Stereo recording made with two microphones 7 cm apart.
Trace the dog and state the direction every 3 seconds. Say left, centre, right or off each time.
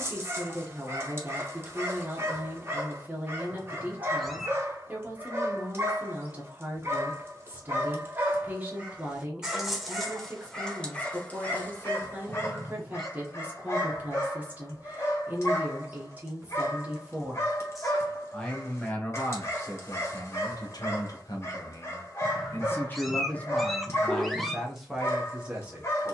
right, right, right, centre, left, left, left, left, left.